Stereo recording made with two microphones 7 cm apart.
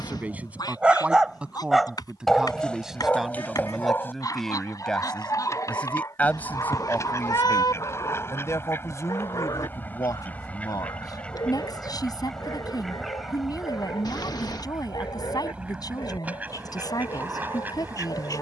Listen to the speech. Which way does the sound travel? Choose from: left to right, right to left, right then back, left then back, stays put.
right to left.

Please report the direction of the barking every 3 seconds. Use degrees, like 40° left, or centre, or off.
10° right, 30° left, 50° left, 60° left, 70° left, 70° left.